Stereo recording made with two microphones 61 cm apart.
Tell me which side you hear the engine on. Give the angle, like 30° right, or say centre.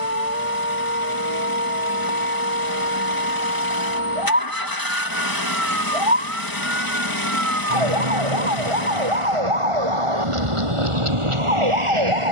30° left.